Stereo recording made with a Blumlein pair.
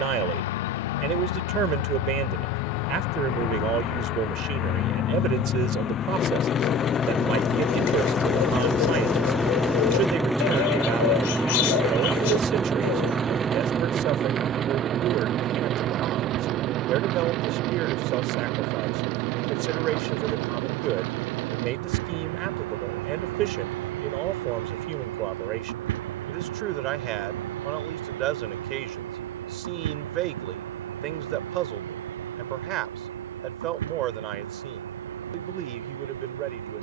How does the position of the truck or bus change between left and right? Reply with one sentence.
You can hear the truck or bus go from the left side to the right.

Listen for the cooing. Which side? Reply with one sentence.
You can hear the cooing on the left.